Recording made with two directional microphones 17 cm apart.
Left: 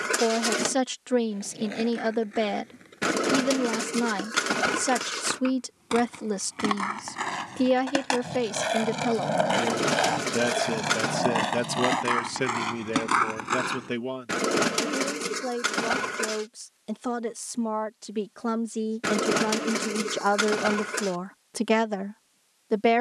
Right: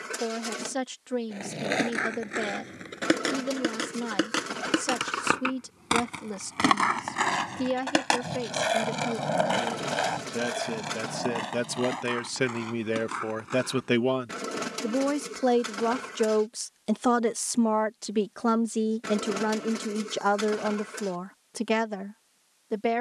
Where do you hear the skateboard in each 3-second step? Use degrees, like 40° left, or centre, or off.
60° right, 50° right, 20° right, 30° left, 60° left, off, off, off.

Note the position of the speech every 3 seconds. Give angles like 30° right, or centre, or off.
40° left, 40° left, 40° left, 20° left, 20° right, 40° right, centre, 20° left.